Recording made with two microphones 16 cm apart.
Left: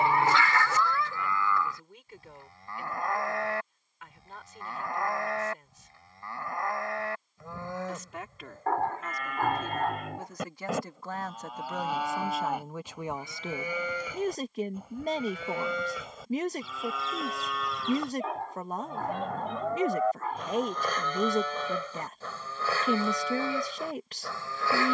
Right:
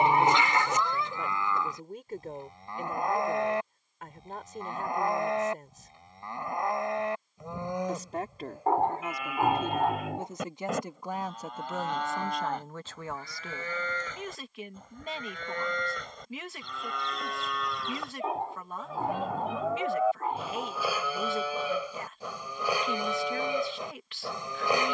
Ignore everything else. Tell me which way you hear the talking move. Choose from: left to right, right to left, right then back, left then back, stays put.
right to left.